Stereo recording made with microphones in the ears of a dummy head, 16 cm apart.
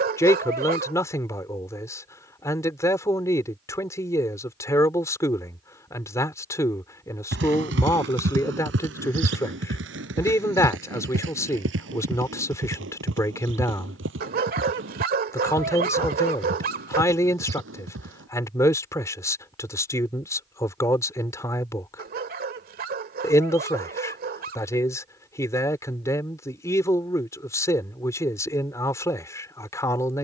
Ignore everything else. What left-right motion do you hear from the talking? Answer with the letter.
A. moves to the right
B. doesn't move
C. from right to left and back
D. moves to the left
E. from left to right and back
B.